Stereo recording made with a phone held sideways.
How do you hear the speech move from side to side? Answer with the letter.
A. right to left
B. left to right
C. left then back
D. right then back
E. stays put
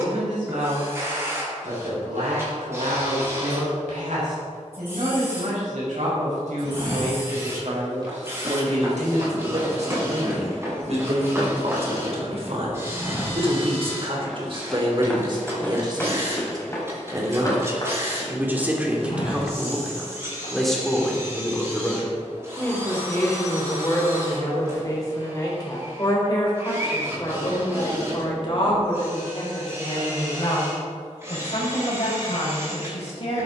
A.